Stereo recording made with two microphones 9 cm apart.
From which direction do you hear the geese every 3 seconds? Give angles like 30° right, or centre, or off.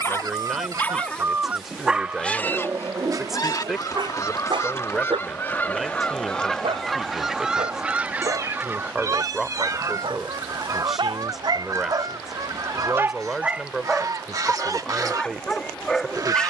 20° right, 30° left, 10° right, 40° right, 40° right, 40° right.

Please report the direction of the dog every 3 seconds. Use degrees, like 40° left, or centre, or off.
centre, 60° right, 80° right, 60° right, 10° right, 10° left.